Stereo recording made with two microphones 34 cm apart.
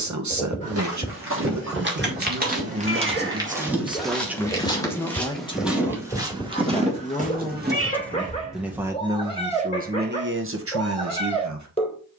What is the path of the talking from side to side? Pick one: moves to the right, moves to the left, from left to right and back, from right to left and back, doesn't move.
from right to left and back.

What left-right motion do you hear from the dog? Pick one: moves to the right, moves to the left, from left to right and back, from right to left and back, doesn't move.
doesn't move.